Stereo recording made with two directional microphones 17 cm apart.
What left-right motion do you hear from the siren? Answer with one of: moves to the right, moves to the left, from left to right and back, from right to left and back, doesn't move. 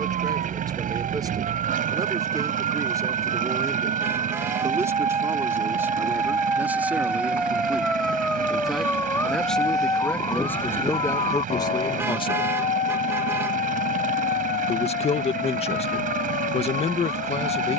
moves to the left.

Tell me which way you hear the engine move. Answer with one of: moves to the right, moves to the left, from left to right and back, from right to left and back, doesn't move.
doesn't move.